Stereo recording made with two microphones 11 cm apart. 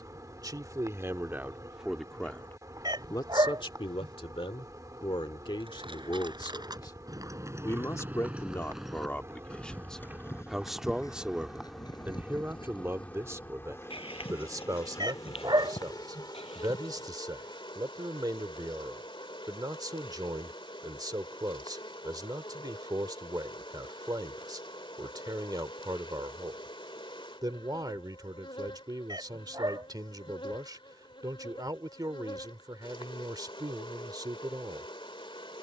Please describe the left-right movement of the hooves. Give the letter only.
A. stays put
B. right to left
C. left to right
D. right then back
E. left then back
B.